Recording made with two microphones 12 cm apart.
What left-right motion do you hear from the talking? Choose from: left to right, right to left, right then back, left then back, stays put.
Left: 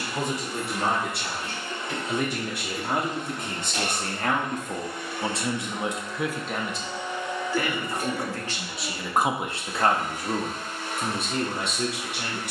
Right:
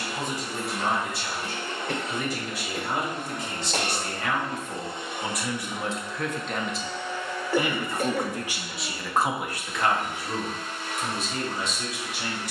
right then back.